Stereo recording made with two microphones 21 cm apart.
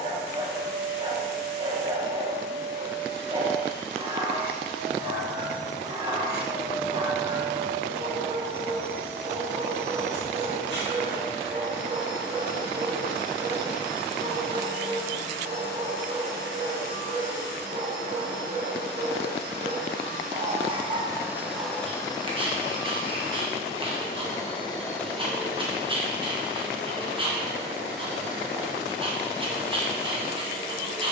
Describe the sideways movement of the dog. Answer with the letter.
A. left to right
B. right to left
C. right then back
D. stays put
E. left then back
D.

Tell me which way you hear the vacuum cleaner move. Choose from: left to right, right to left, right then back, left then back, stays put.
left then back.